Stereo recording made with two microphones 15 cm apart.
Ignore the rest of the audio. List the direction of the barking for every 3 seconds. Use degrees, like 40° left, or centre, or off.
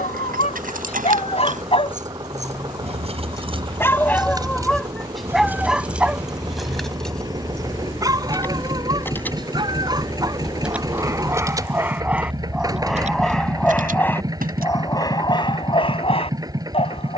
40° left, centre, 20° right, 20° right, 10° left, 30° left.